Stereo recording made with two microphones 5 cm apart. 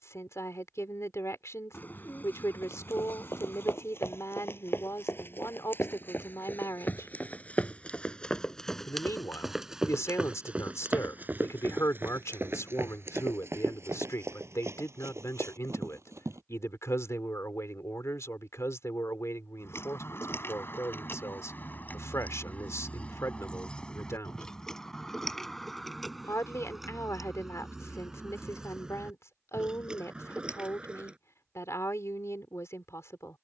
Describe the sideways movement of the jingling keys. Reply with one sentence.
In this clip you hear the jingling keys travel towards the right.